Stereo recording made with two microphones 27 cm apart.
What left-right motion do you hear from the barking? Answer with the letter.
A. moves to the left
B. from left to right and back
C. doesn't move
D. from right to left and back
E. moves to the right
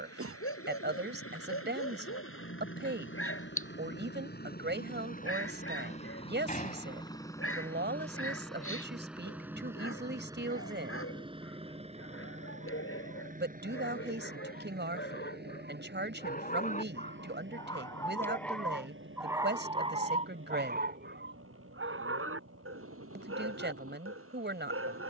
E.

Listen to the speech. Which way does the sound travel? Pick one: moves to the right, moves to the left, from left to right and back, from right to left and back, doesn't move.
doesn't move.